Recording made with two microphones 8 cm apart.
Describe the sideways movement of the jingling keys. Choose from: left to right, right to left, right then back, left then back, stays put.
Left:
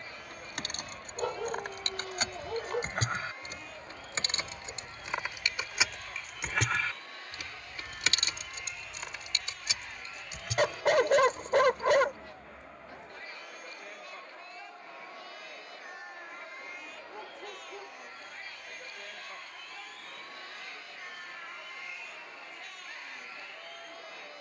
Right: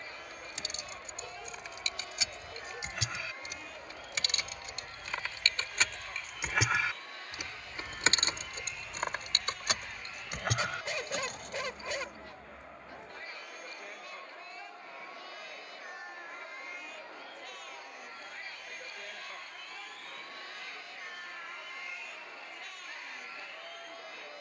left to right.